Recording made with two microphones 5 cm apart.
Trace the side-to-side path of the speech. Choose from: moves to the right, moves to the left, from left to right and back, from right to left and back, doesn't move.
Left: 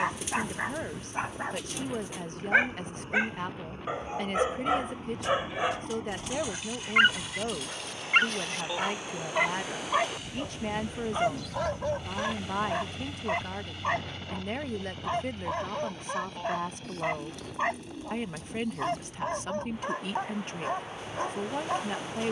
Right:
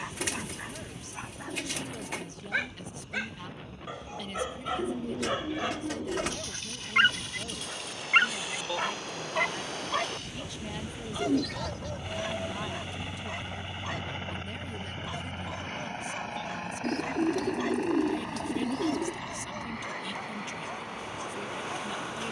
doesn't move.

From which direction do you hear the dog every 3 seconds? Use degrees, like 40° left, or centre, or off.
40° left, 20° left, centre, 20° left, 40° left, 40° left, 40° left, 40° left.